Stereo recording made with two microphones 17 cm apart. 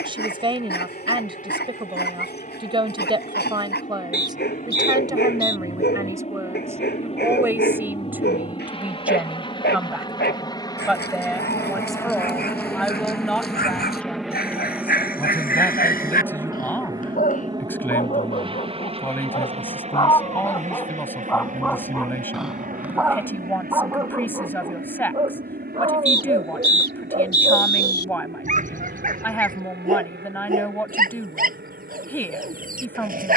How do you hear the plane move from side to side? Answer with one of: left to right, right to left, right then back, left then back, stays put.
left to right.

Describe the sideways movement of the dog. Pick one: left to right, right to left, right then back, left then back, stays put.
left to right.